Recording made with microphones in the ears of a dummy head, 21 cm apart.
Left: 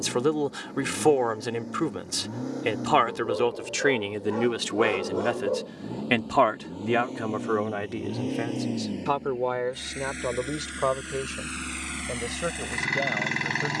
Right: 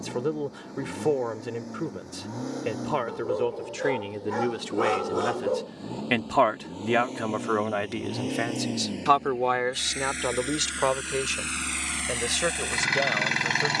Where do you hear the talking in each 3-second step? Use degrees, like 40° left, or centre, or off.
40° left, 30° left, 30° right, 60° right, 70° right.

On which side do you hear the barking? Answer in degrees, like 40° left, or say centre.
40° right.